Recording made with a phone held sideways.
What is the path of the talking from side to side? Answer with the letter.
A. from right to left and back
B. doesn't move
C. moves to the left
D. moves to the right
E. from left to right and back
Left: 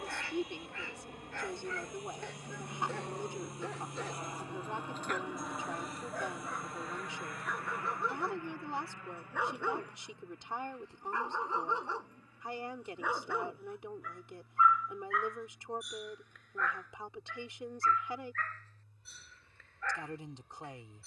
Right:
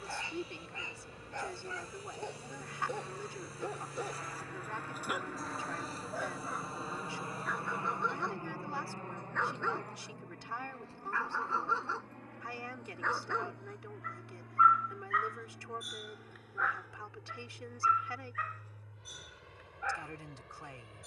B.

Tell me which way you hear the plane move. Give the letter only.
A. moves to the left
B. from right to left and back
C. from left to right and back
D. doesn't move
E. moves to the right
E.